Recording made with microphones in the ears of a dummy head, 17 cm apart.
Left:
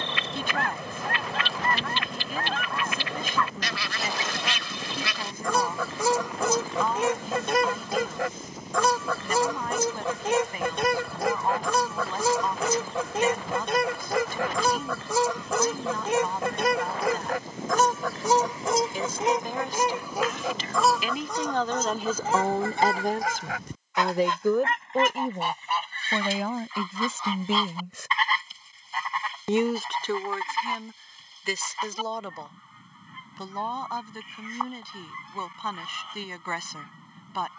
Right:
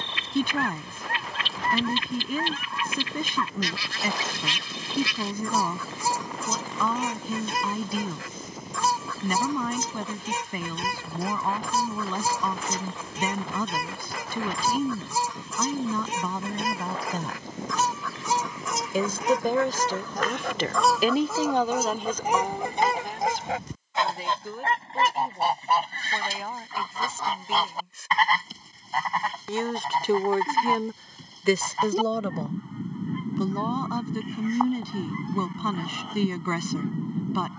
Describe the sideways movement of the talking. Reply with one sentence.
In this clip you hear the talking go left and come back.